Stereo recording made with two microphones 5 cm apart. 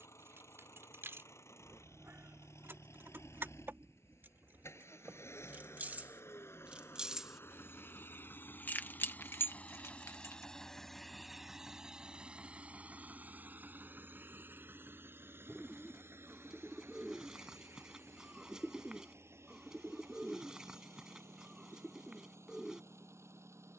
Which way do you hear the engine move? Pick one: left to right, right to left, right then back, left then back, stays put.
left to right.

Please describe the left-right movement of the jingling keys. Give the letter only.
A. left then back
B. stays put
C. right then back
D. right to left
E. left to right
D.